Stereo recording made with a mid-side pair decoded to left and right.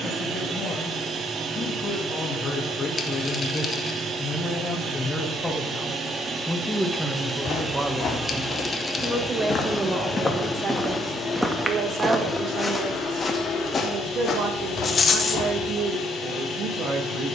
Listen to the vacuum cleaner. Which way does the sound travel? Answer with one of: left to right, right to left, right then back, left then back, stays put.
right to left.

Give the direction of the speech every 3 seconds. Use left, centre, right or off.
left, left, centre, right, right, right.